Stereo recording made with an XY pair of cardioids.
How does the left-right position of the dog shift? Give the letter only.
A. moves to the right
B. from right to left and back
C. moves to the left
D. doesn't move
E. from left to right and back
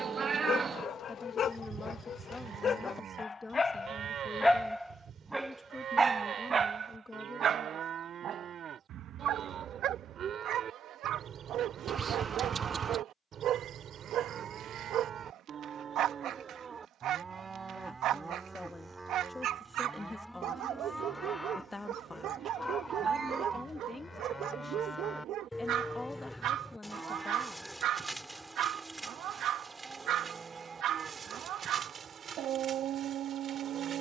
A.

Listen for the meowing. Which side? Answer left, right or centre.
right.